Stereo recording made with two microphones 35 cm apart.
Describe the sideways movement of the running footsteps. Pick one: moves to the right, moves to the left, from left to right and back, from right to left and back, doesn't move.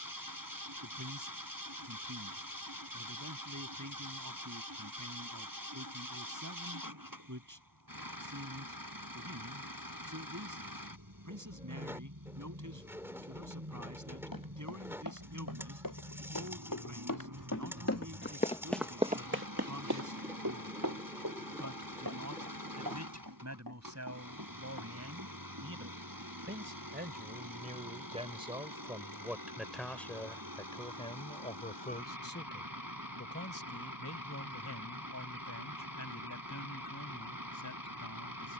moves to the right.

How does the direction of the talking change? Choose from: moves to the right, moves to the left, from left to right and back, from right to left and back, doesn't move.
moves to the left.